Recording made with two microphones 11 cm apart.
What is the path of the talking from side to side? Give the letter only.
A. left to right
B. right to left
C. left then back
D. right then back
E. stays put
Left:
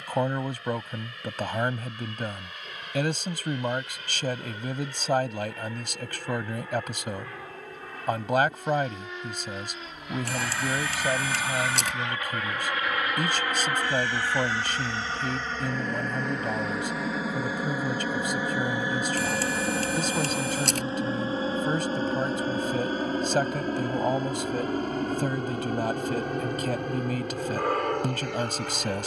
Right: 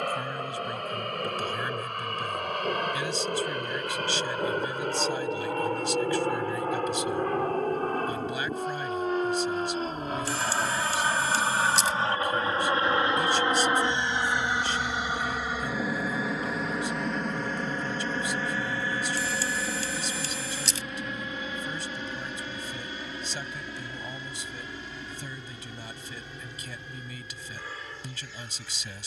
E.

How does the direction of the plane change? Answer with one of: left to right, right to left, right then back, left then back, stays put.
right to left.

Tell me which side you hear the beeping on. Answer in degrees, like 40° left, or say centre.
60° left.